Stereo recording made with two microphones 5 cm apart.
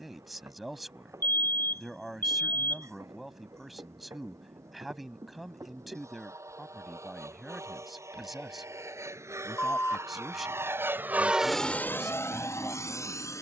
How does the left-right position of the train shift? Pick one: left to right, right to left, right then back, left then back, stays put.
right to left.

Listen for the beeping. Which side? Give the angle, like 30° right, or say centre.
50° left.